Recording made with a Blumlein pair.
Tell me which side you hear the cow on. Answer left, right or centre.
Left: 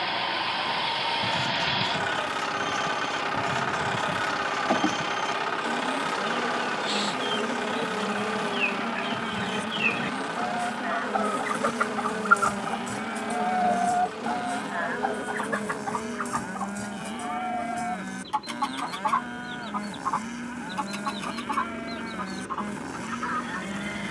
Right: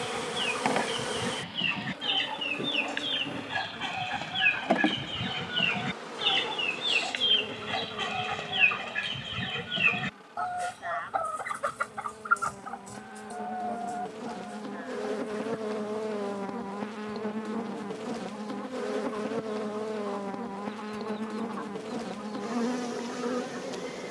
left.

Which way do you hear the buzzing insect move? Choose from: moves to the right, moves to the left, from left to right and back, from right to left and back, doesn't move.
from right to left and back.